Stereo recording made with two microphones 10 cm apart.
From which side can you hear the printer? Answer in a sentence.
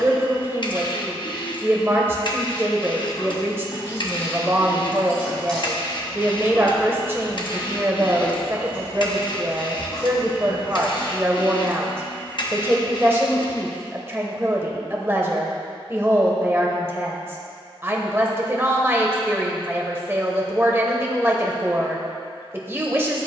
You can hear the printer on the left.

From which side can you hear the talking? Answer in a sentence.
In this clip you hear the talking on the right.